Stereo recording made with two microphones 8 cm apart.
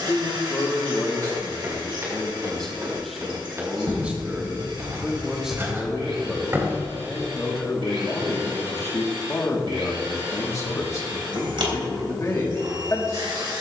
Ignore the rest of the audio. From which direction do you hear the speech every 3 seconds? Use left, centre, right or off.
left, centre, left, left, left.